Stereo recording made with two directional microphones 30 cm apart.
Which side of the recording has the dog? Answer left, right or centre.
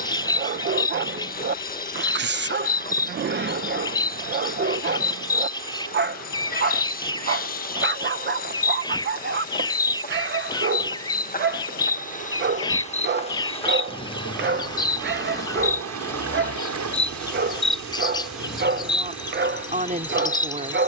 right.